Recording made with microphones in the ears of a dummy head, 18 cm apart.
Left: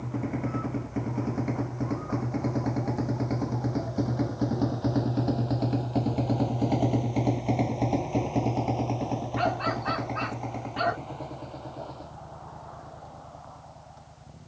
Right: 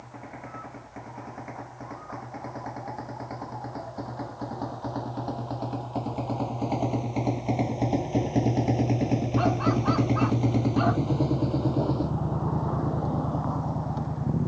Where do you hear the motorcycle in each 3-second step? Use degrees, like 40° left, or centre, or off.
50° left, 30° left, centre, 50° right, 70° right.